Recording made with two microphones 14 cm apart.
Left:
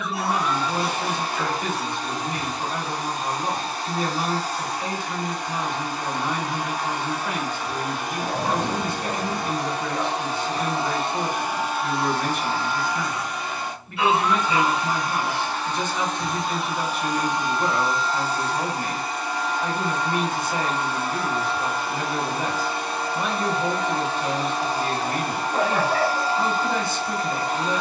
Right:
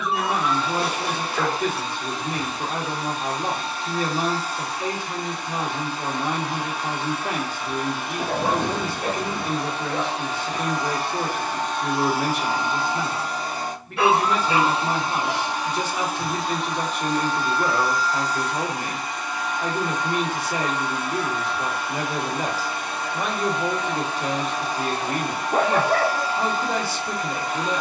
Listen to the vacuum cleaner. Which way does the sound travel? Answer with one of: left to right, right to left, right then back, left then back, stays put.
right then back.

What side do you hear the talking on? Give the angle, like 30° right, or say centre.
80° right.